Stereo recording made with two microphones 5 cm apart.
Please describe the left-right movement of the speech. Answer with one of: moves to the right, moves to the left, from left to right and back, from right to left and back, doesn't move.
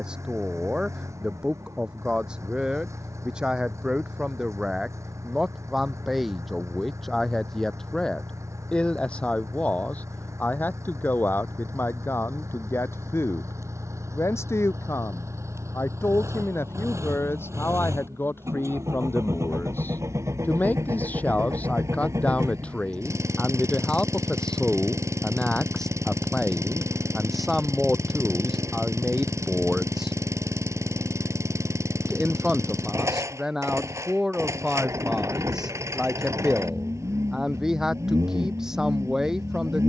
from right to left and back.